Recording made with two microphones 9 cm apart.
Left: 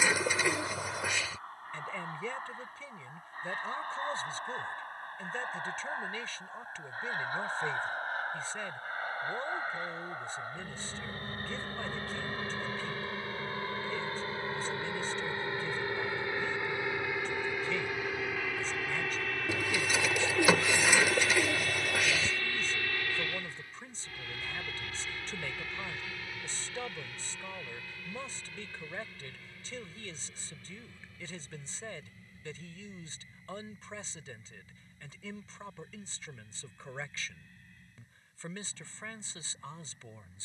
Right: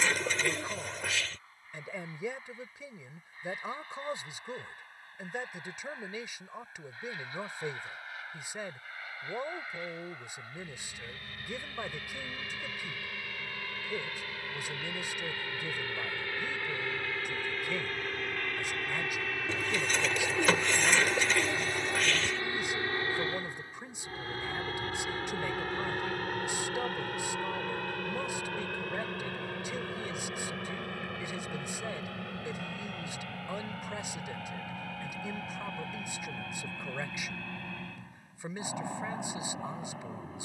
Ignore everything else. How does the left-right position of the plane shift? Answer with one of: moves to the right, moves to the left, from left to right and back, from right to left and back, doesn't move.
moves to the right.